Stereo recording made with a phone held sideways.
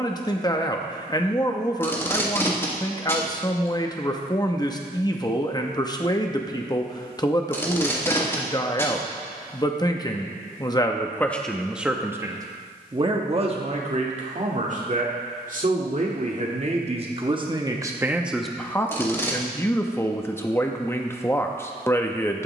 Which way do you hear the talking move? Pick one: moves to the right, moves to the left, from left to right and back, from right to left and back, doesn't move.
from left to right and back.